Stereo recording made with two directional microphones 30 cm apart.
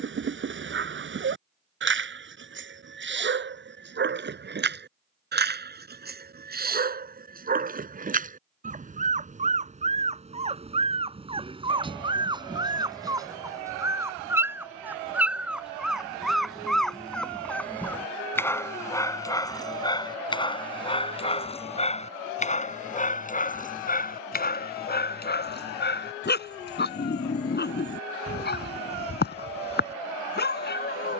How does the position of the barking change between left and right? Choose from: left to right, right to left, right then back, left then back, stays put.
right to left.